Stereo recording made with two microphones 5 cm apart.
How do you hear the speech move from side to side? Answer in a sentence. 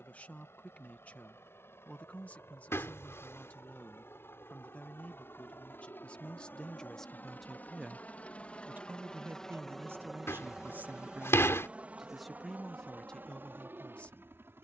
You can hear the speech move from left to right and back again.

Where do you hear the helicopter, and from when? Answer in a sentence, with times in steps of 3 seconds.
You can hear the helicopter on the left from 0 s, in the centre from 9 s and on the right from 12 s.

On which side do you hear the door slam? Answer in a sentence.
In this clip you hear the door slam on the left.